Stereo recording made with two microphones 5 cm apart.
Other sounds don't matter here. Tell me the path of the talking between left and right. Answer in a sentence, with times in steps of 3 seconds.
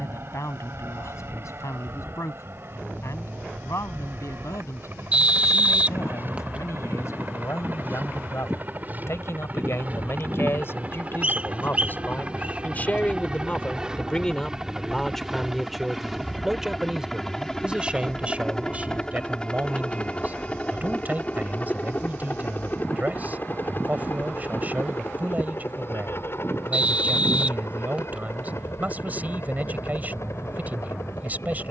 You can hear the talking on the left from 0 s, in the centre from 15 s and on the right from 18 s.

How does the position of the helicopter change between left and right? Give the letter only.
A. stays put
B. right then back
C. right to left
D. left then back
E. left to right
C.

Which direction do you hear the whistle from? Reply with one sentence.
You can hear the whistle on the right.